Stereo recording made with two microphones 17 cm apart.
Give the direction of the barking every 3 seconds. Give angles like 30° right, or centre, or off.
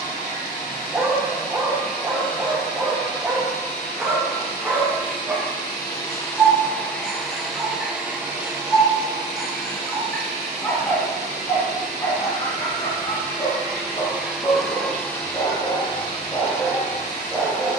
10° right, 10° right, 10° right, 10° left, 30° left, 20° left.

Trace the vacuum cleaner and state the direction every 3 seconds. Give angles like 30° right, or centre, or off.
50° left, 40° left, centre, 40° right, 20° right, 40° left.